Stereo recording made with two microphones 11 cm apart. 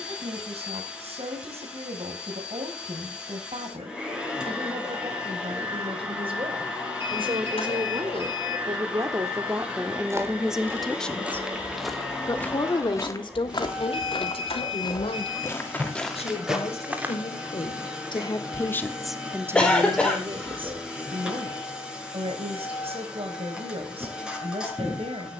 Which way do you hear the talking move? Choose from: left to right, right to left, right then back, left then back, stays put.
left then back.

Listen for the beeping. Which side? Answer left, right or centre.
left.